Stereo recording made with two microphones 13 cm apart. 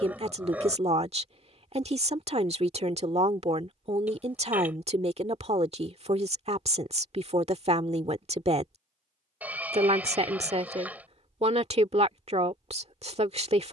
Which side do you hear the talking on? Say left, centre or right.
right.